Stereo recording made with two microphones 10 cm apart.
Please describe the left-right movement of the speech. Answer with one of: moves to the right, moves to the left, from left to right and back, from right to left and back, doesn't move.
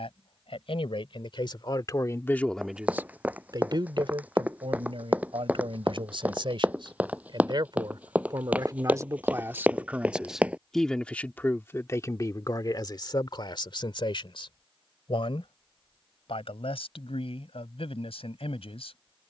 from left to right and back.